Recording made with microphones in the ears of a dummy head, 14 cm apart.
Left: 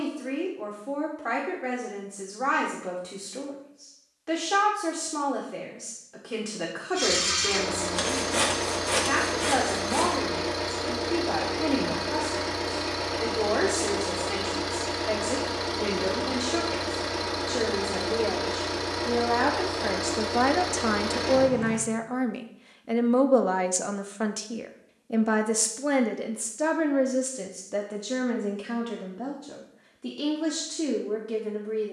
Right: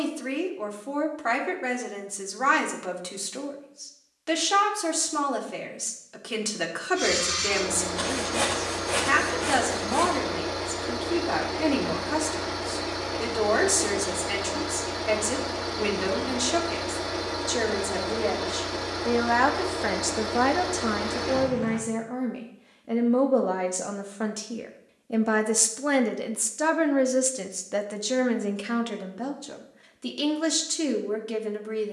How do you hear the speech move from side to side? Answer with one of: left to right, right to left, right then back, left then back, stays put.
left then back.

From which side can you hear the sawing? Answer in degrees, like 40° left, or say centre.
30° left.